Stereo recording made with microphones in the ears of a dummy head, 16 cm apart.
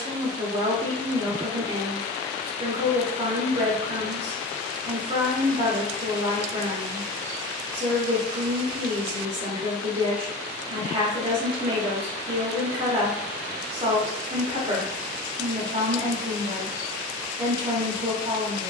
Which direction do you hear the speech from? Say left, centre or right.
right.